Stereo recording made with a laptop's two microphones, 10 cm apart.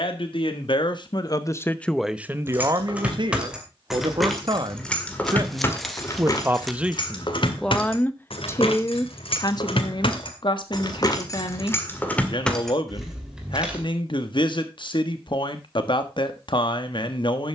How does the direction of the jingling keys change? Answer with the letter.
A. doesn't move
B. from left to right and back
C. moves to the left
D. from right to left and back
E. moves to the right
D.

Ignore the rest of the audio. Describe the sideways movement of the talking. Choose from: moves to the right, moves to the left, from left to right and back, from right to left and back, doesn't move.
from left to right and back.